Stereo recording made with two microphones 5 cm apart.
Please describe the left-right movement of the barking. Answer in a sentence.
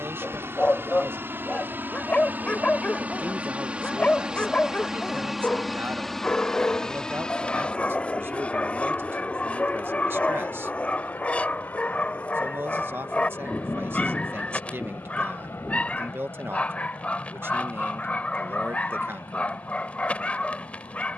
You can hear the barking stay put.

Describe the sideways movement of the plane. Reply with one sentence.
In this clip you hear the plane move from right to left.